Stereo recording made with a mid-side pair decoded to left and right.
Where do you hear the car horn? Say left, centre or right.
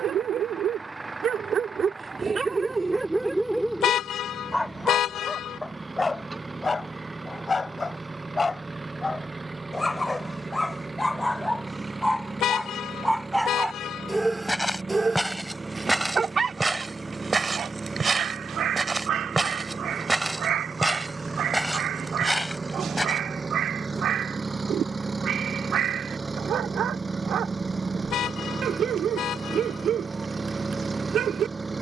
left.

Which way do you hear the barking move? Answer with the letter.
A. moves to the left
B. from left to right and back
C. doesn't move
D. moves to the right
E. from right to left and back
E.